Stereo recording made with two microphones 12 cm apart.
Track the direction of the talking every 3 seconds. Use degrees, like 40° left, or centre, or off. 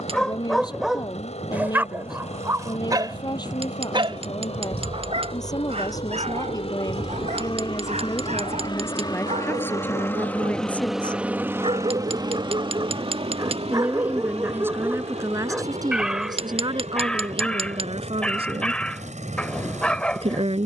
40° left, 30° left, 30° left, 20° left, 20° right, 40° right, 50° right.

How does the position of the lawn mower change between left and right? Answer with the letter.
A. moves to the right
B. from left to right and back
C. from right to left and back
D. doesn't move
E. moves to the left
A.